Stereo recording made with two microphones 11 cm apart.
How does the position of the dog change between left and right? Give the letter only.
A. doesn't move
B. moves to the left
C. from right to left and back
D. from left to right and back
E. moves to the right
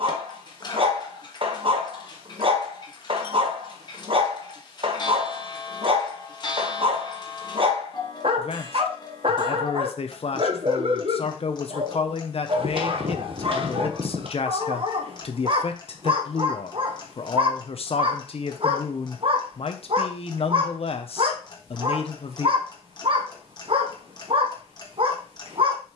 A.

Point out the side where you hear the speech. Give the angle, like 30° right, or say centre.
60° left.